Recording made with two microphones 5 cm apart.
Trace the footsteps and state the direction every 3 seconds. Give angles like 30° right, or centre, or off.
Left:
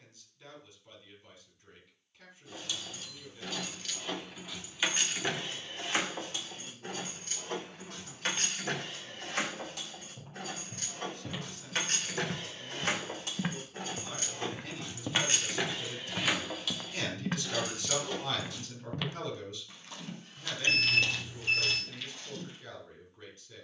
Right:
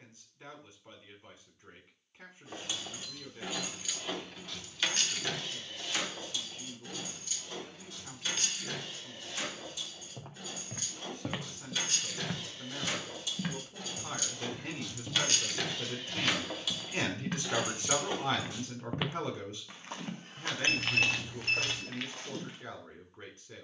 off, off, off, 50° right, 20° left, 30° left, 30° right, 60° right.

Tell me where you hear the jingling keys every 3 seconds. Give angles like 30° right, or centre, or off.
30° right, 10° left, 50° left, 60° left, 50° left, centre, 30° right, off.